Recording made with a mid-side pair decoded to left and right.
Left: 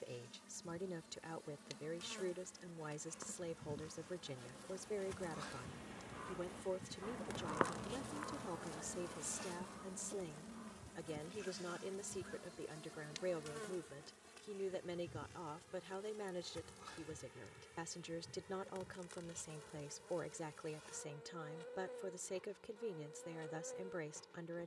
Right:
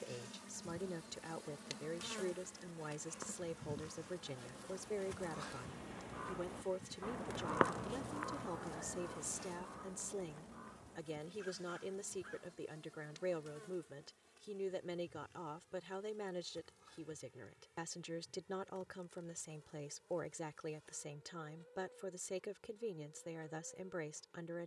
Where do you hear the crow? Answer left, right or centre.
right.